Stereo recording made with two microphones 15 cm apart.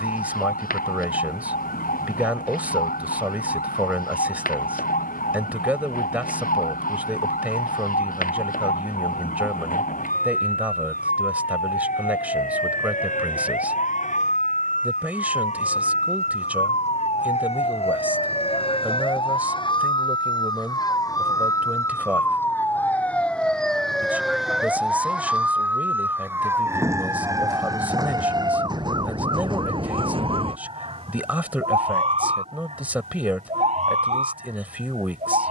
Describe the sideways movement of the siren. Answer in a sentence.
You can hear the siren move from left to right.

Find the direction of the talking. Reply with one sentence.
In this clip you hear the talking in the centre.